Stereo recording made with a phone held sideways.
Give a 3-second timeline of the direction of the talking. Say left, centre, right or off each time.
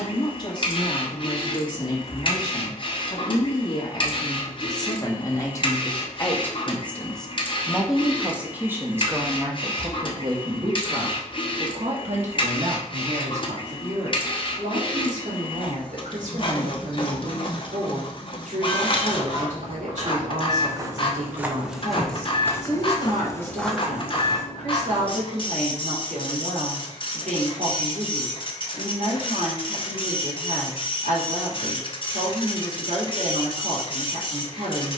left, left, centre, right, right, right, right, right, right, right, right, right.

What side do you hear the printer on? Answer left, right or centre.
left.